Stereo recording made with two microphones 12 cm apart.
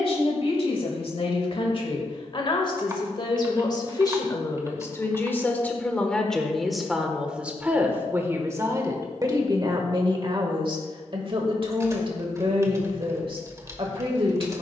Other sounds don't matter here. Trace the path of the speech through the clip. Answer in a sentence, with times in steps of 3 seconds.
In this clip you hear the speech on the left from 0 s, in the centre from 6 s and on the right from 9 s.